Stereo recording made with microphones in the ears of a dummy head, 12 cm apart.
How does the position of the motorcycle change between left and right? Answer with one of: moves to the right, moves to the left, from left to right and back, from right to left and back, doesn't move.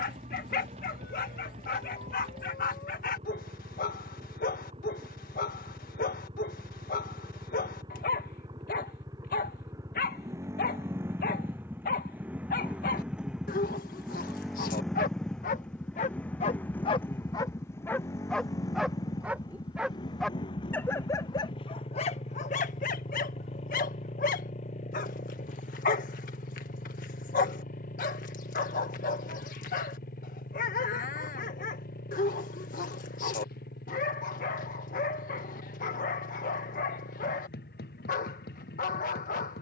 moves to the left.